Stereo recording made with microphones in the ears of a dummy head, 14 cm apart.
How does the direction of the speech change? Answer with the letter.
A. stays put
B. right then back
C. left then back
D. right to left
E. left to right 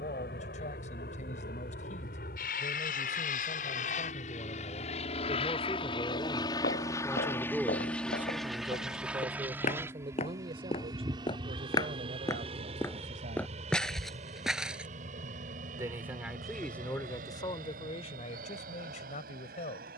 B.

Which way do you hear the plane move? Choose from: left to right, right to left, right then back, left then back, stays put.
left to right.